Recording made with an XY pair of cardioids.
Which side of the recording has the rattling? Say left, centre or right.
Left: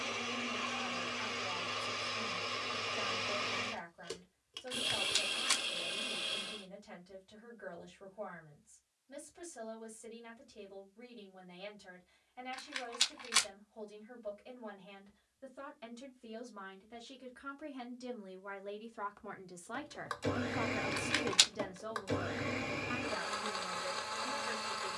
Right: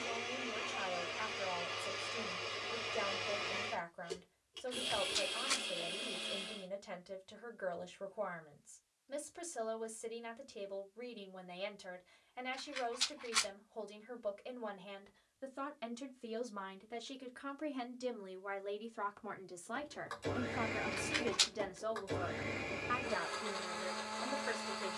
left.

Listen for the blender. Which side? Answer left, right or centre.
left.